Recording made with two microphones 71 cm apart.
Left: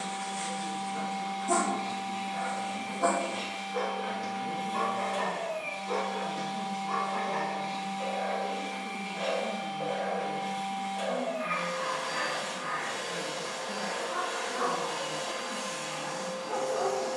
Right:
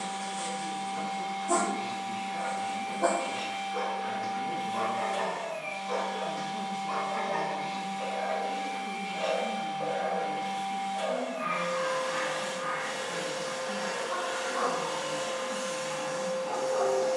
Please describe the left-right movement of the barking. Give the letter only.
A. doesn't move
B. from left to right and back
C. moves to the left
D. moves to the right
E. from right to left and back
D.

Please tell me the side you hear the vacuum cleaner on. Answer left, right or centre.
right.